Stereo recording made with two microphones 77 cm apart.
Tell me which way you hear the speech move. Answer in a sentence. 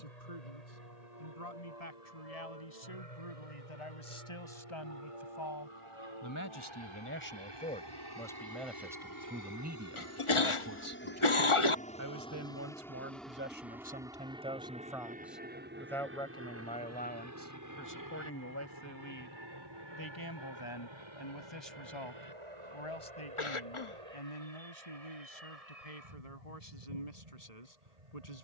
In this clip you hear the speech go right and come back.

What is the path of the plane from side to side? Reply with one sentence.
In this clip you hear the plane travel towards the right.